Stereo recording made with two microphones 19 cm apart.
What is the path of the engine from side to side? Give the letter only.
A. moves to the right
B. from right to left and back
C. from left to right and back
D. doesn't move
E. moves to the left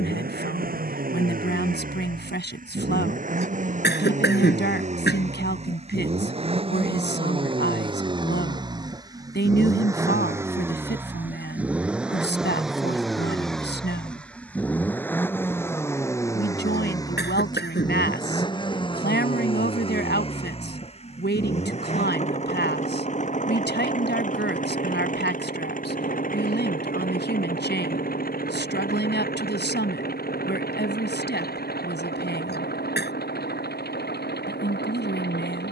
E.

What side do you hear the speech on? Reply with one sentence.
You can hear the speech on the left.